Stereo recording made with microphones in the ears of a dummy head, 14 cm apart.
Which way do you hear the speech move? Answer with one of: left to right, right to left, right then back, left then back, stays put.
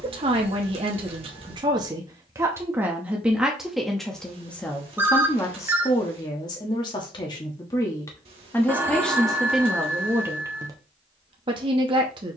left then back.